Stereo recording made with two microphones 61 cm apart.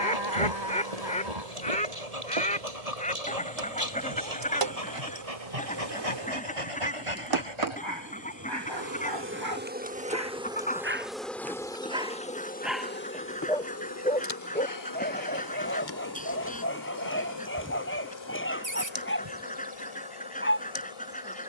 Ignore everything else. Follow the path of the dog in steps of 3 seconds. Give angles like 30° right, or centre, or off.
80° right, 70° right, 50° right, 20° right, centre, 20° left, 20° left.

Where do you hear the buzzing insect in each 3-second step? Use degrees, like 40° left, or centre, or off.
70° right, 60° right, 40° right, 10° right, 20° left, 40° left, 50° left.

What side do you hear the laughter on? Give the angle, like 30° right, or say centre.
40° right.